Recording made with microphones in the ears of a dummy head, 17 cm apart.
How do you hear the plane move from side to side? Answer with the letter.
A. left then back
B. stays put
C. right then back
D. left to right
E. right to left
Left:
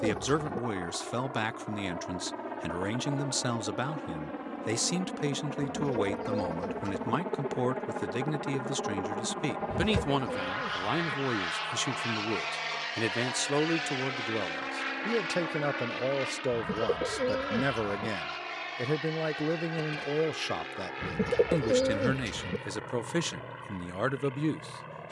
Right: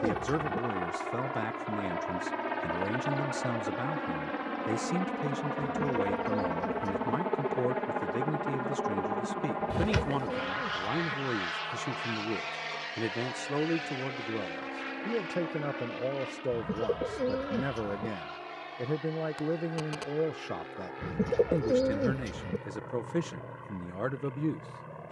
E.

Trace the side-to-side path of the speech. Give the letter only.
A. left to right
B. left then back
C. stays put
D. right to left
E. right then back
C.